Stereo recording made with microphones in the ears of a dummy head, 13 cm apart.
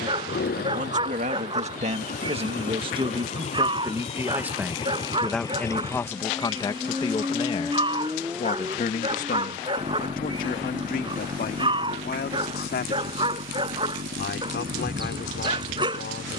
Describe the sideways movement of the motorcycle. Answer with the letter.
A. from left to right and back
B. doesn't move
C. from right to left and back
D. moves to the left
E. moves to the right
E.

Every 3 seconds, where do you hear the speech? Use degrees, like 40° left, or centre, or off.
50° right, 10° right, 30° left, 60° left, 70° left, 70° left.